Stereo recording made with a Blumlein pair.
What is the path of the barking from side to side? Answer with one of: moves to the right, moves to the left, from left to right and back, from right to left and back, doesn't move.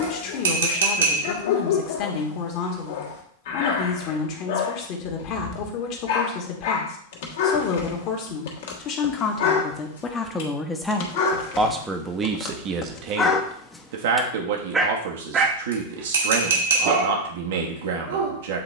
moves to the right.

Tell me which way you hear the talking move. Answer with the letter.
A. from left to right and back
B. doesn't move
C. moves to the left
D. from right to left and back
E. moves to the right
E.